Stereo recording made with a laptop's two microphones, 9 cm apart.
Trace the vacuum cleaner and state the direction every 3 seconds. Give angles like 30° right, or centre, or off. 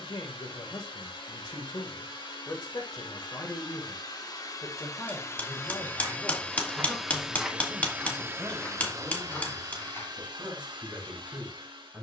60° left, 40° left, 10° right, 50° right.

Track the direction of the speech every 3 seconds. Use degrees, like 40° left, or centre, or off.
50° left, 30° left, centre, 10° right.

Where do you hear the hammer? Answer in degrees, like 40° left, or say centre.
20° left.